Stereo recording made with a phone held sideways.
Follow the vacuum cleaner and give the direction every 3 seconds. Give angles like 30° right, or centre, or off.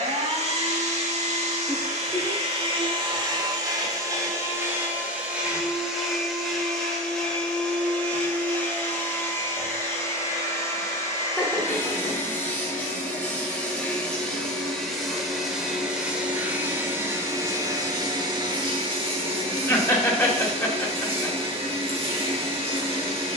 50° right, 20° right, 10° left, 20° left, 10° left, 10° right, 40° right, 50° right.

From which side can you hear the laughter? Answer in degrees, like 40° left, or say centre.
10° left.